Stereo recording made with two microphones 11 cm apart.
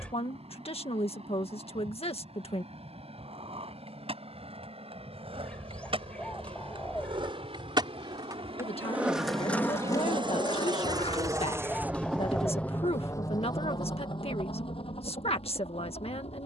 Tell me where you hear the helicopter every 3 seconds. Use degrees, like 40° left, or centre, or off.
80° right, 80° right, 70° right, 40° right, 30° left, 70° left.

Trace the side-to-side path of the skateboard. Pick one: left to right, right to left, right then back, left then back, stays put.
right to left.